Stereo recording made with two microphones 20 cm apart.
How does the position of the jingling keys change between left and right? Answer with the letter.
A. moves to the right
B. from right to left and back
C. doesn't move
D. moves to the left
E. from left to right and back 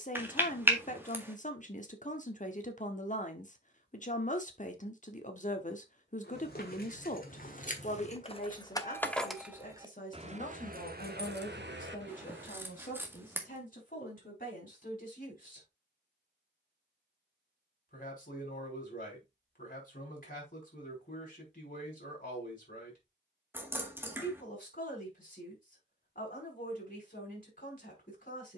A.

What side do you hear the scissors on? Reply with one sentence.
In this clip you hear the scissors in the centre.